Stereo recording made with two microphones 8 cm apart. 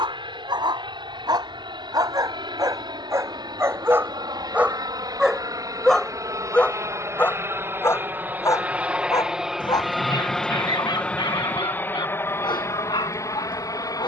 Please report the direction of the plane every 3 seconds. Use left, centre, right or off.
right, right, right, centre, left.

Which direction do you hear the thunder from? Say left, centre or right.
left.